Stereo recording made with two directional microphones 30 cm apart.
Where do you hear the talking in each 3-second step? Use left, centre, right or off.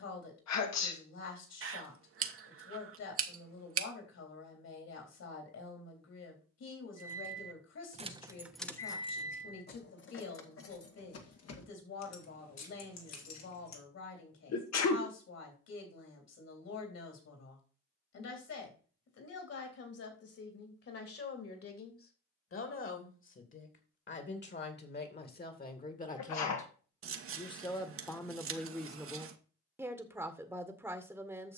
left, left, left, left, left, left, left, left, left, centre, centre.